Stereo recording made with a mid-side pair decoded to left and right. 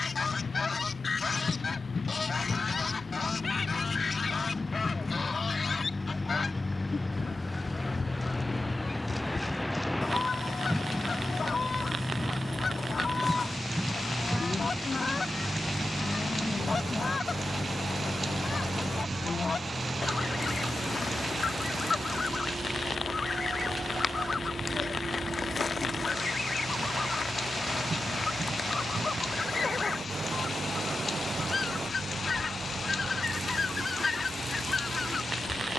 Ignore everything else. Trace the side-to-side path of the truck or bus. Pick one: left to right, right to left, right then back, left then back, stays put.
left to right.